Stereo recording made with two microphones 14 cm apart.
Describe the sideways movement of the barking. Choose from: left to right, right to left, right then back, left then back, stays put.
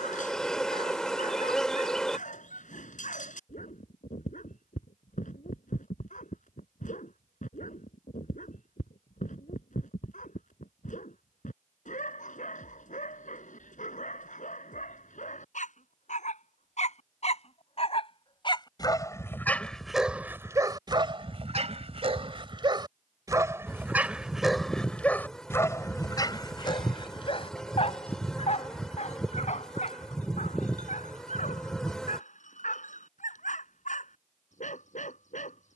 right then back.